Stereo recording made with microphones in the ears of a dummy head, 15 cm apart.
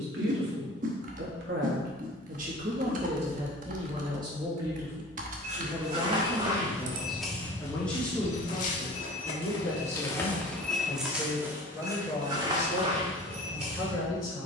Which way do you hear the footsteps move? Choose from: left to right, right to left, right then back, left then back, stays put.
left then back.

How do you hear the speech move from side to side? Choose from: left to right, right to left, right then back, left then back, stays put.
right to left.